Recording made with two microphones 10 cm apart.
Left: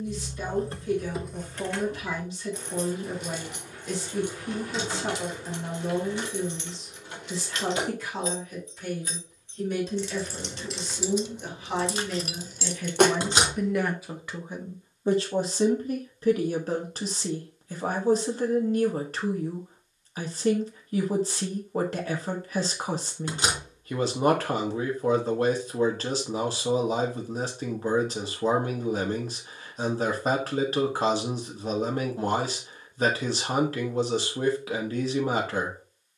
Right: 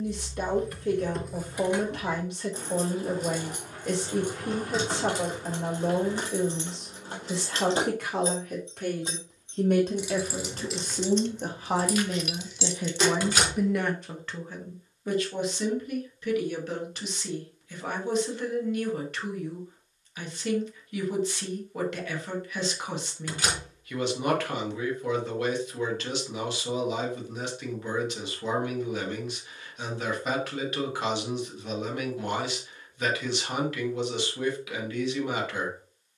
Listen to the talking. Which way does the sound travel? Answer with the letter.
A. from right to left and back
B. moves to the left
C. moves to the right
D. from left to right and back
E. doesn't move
B.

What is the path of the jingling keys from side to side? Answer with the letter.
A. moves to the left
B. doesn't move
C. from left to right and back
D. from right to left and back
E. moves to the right
C.